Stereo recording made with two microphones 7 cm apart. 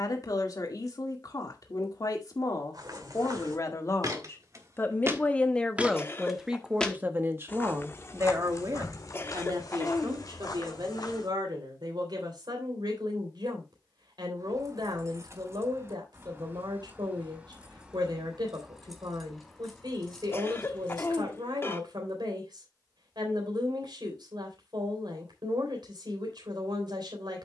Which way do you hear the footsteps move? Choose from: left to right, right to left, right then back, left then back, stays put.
right to left.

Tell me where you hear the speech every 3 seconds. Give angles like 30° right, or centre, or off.
50° left, 30° left, 30° right, 70° right, 80° right, 80° right, 80° right, 80° right, 80° right.